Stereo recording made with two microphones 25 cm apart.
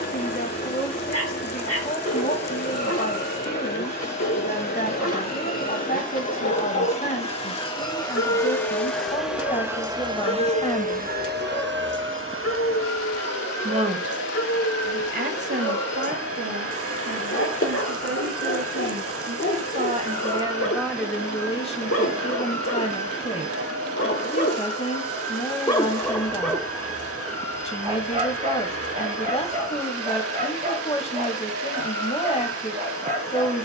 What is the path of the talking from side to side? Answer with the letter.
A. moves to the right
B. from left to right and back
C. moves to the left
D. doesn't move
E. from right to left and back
B.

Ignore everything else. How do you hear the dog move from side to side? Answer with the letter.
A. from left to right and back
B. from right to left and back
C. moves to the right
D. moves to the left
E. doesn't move
C.